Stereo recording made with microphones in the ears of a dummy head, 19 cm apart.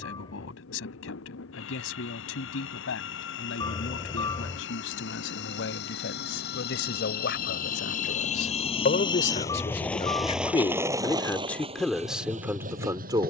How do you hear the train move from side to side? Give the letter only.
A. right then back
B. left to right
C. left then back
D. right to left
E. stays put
B.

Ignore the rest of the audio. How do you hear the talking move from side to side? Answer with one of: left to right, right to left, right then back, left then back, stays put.
left to right.